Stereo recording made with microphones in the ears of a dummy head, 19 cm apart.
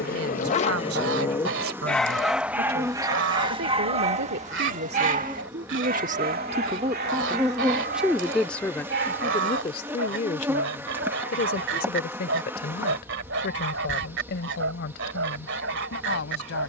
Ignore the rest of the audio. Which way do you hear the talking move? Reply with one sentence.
In this clip you hear the talking go from the right side to the left.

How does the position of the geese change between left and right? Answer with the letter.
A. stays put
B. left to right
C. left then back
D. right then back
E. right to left
A.